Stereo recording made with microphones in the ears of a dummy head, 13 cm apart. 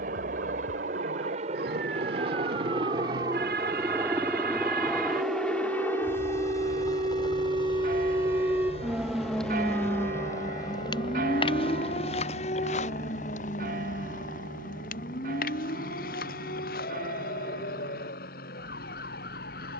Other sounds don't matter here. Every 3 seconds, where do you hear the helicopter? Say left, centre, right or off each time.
right, centre, left, left, left, left, left.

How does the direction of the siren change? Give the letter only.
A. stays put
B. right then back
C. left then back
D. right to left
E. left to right
D.